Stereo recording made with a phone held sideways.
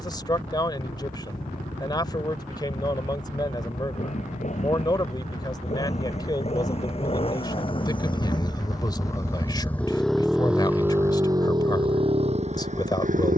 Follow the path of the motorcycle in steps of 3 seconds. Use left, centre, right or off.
left, left, left, centre, right.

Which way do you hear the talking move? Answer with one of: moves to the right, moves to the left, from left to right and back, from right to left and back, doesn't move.
doesn't move.